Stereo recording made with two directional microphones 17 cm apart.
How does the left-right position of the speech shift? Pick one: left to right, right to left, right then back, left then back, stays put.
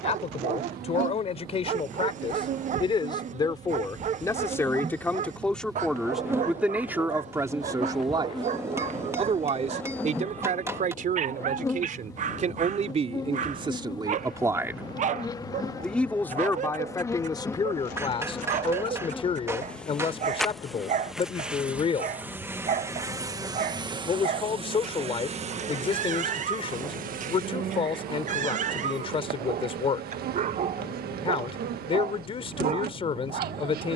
right then back.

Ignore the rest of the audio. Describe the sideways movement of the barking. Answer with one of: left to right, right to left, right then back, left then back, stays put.
stays put.